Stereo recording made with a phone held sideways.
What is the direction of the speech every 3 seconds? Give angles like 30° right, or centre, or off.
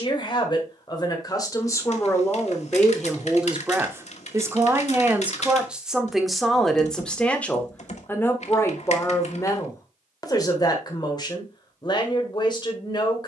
20° left, 10° right, 10° left, 30° left, 30° left.